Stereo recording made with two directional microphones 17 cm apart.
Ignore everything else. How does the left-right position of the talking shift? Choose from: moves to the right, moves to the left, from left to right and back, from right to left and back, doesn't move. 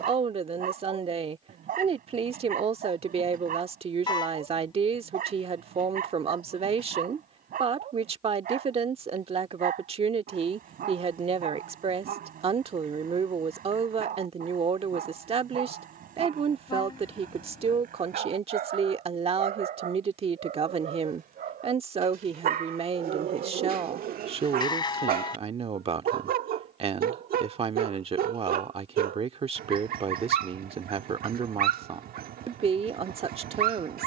doesn't move.